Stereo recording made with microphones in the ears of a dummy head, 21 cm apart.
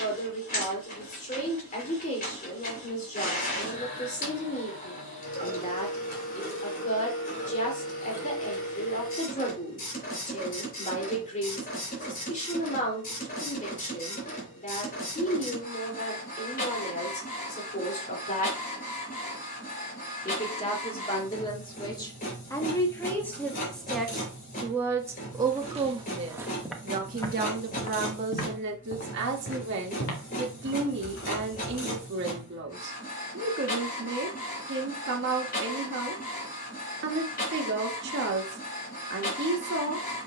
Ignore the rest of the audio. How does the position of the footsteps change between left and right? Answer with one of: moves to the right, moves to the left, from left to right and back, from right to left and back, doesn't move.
moves to the left.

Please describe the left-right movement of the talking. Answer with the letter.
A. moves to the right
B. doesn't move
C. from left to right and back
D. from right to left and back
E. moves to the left
A.